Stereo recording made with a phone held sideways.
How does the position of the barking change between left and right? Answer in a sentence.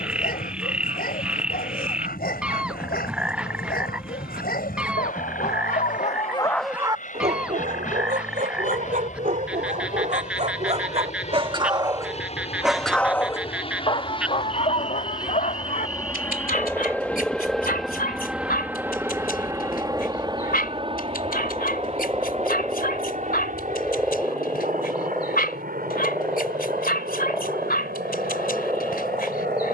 You can hear the barking go right and come back.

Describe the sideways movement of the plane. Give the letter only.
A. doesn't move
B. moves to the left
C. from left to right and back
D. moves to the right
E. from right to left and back
D.